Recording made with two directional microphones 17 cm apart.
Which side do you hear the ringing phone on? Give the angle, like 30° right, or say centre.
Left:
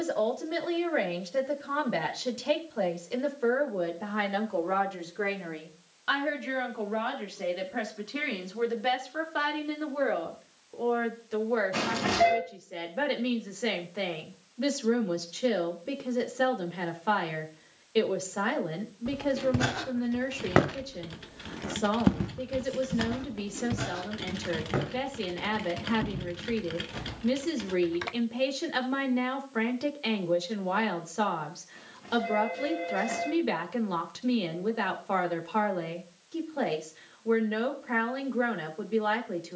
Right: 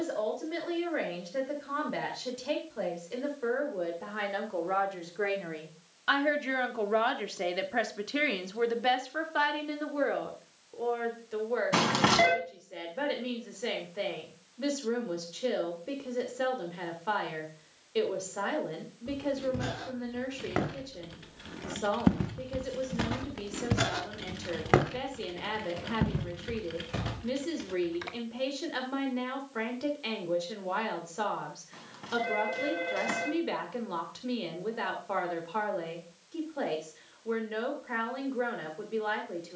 70° right.